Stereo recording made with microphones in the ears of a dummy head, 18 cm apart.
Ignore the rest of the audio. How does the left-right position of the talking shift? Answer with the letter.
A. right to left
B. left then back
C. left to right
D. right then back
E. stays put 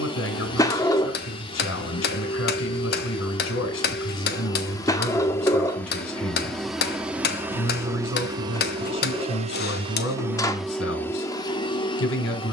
E.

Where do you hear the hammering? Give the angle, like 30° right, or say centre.
50° left.